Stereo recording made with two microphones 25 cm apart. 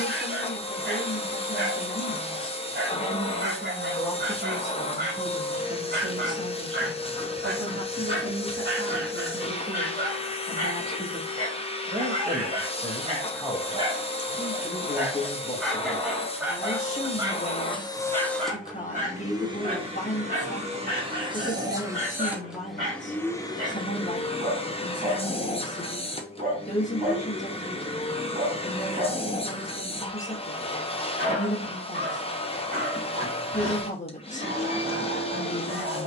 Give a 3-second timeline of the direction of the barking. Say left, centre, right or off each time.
right, right, right, right, right, centre, right, right, right, right, right, right.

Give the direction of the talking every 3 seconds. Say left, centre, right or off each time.
left, centre, right, right, centre, left, left, left, left, left, left, left.